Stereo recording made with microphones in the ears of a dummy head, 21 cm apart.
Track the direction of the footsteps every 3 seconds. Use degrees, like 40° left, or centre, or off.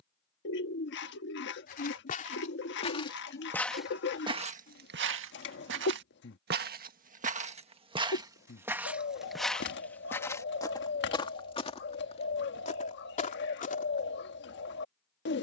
30° left, 30° right, 30° right, 10° left, 30° left.